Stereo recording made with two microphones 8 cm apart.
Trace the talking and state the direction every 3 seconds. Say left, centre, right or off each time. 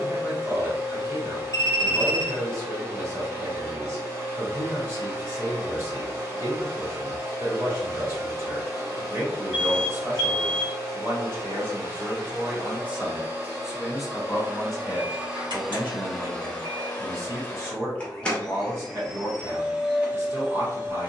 right, right, right, right, centre, right, right.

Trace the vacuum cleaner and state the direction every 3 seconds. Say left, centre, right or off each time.
right, right, right, right, right, centre, centre.